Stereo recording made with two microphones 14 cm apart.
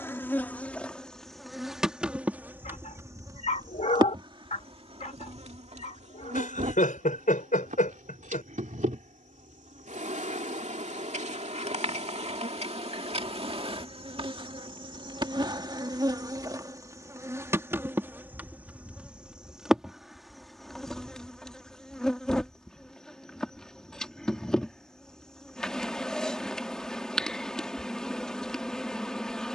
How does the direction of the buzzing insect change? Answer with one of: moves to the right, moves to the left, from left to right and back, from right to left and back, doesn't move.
from left to right and back.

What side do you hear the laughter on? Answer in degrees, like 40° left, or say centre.
70° left.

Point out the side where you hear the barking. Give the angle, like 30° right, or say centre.
50° left.